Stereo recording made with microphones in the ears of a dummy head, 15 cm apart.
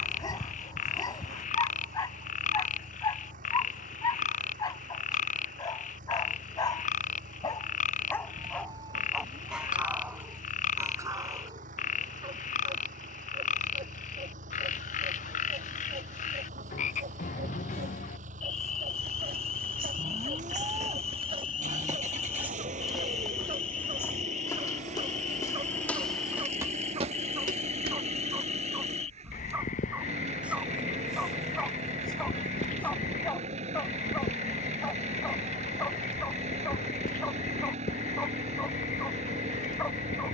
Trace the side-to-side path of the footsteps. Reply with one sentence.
In this clip you hear the footsteps go left and come back.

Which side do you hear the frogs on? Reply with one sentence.
In this clip you hear the frogs on the left.